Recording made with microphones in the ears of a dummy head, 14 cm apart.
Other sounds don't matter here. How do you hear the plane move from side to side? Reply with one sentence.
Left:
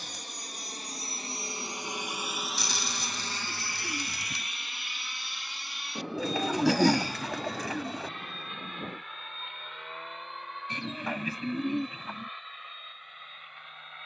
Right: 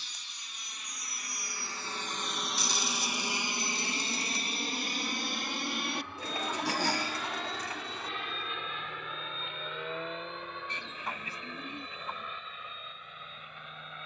You can hear the plane move from left to right.